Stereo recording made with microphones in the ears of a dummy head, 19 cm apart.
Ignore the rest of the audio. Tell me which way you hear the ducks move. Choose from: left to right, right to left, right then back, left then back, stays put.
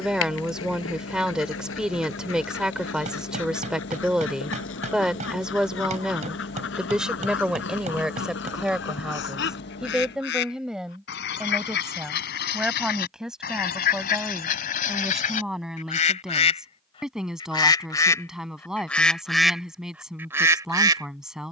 left to right.